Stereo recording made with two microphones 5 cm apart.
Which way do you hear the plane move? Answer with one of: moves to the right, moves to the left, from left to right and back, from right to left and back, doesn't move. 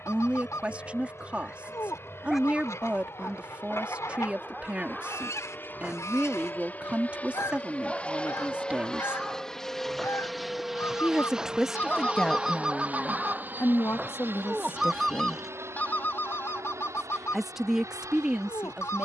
moves to the right.